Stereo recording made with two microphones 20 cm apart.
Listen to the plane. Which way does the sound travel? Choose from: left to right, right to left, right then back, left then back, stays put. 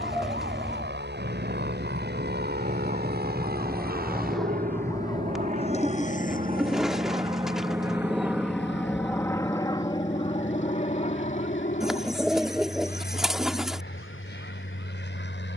right to left.